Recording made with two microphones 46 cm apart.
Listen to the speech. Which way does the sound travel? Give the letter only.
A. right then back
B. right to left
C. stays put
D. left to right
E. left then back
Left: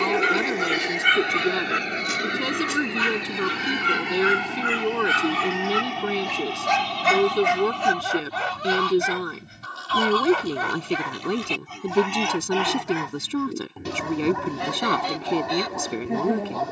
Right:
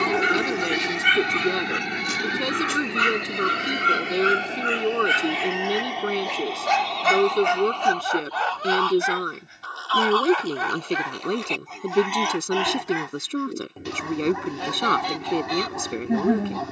C.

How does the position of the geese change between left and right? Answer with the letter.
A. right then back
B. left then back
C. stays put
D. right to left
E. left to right
B.